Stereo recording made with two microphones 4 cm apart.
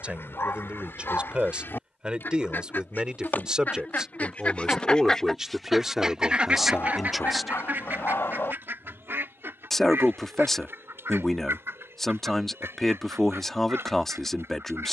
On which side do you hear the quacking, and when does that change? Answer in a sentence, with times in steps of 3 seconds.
You can hear the quacking on the left from 0 s and on the right from 6 s.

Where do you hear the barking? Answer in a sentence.
You can hear the barking on the left.